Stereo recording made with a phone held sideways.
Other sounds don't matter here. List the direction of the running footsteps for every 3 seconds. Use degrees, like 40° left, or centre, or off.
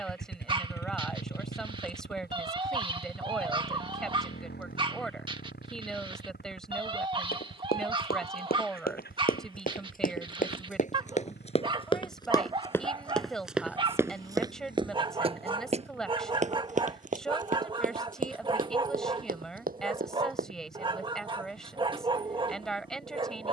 off, off, 70° left, 50° left, centre, 50° right, 60° right, off.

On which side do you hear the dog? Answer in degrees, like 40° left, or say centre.
30° right.